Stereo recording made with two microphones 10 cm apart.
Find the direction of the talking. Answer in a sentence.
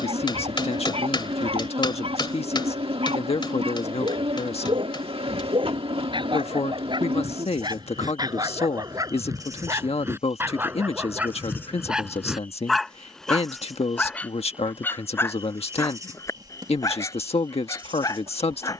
You can hear the talking on the left.